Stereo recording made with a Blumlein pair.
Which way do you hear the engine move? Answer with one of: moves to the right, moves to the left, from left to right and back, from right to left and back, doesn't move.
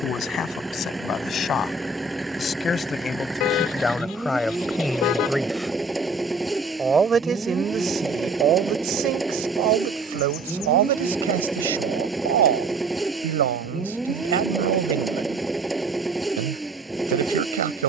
doesn't move.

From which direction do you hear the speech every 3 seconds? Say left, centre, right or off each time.
left, centre, right, right, right, right.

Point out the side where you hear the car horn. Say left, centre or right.
left.